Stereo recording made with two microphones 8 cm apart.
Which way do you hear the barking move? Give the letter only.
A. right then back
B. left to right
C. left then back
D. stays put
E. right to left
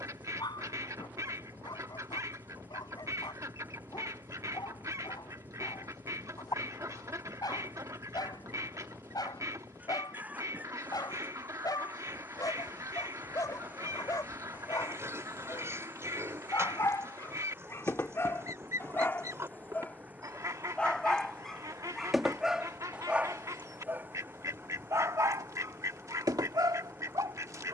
B.